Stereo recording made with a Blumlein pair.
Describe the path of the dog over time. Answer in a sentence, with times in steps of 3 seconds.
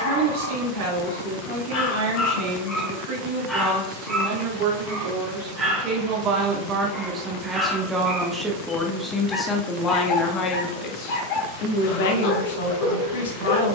In this clip you hear the dog on the left from 0 s, in the centre from 3 s and on the left from 9 s.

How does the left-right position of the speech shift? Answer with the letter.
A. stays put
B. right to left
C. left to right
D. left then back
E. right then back
B.